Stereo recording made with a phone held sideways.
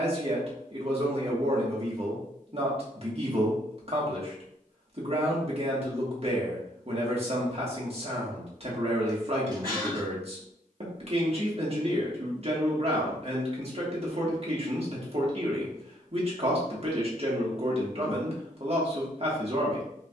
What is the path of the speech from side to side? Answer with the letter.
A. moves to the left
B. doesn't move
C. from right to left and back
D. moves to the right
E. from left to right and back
B.